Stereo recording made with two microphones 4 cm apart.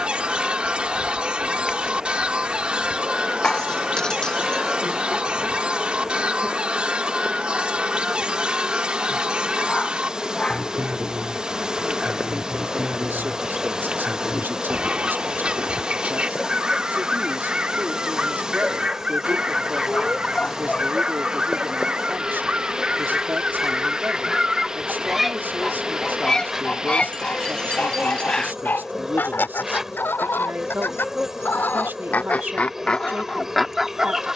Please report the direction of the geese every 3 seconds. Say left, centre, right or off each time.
right, right, right, right, right, right, right, right, centre, left, left, centre.